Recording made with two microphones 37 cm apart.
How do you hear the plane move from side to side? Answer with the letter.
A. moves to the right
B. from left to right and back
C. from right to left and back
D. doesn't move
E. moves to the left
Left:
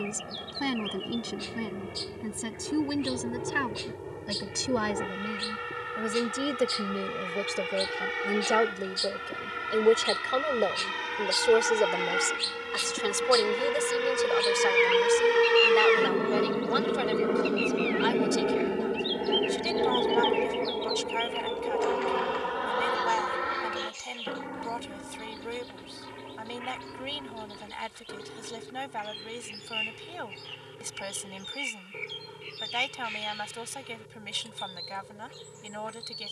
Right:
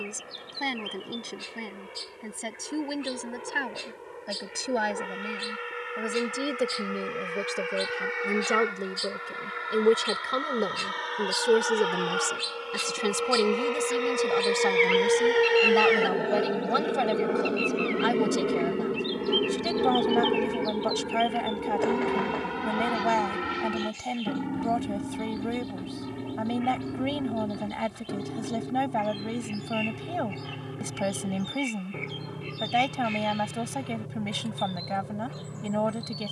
A.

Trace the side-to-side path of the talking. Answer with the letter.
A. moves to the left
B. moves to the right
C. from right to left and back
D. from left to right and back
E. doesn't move
B.